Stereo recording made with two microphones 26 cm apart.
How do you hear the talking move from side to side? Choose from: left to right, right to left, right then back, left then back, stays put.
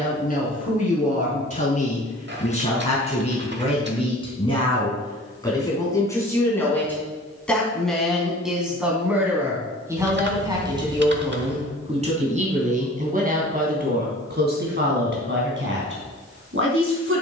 left to right.